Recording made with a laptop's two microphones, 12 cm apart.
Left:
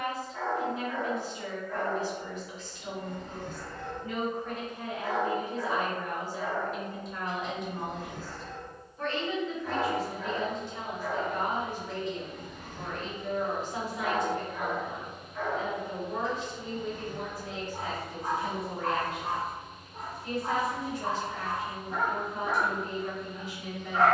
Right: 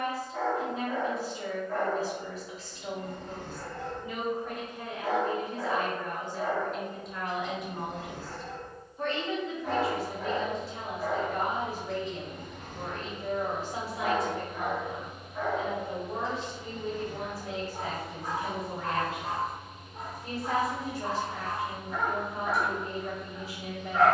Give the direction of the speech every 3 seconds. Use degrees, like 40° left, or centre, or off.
30° right, 10° right, centre, 30° right, 30° right, 30° right, 30° right, 30° right.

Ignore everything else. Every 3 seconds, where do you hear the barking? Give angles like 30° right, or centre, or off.
60° right, 60° right, 60° right, 60° right, 40° right, 10° left, 30° left, 30° left.